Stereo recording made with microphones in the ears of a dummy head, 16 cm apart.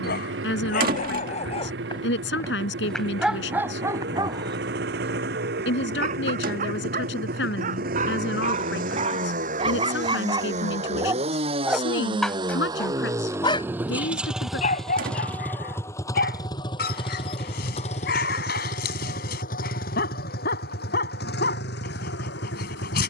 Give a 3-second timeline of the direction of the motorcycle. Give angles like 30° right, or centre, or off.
70° right, 60° right, 50° right, 40° right, 10° right, 20° left, 50° left, 60° left.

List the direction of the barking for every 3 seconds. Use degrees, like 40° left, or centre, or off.
40° left, 20° right, 40° right, 30° right, 30° left, 50° left, 60° left, 60° left.